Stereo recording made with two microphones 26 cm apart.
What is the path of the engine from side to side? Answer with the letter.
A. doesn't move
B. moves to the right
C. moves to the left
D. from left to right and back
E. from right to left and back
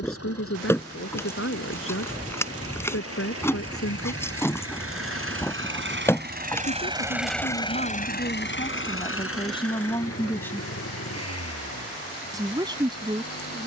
C.